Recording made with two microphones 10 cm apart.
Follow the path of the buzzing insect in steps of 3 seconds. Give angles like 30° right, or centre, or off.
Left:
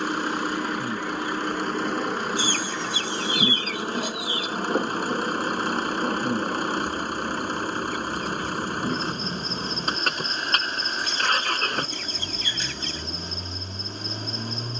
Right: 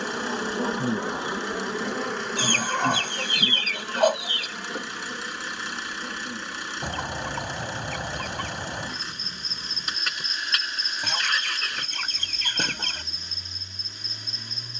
10° right, 40° left, 50° left, 60° left, 60° left.